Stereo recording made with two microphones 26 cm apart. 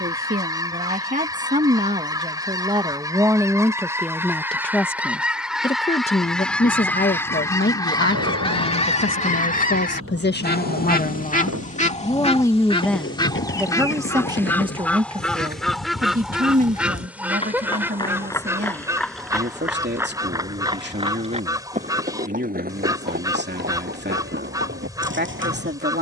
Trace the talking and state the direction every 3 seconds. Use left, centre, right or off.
right, centre, left, left, centre, right, right, right, right.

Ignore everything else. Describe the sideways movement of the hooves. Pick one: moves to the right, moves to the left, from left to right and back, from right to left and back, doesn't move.
moves to the right.